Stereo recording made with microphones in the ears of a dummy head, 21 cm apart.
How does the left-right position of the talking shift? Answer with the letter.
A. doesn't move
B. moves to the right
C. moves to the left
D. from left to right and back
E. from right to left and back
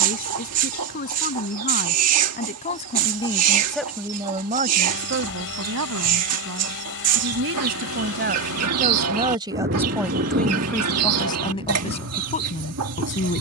D.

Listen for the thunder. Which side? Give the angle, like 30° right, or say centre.
40° right.